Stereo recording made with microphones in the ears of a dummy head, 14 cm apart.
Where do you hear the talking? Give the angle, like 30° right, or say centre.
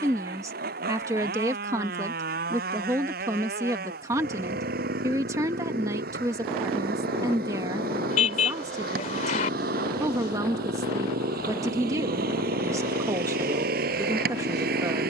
20° right.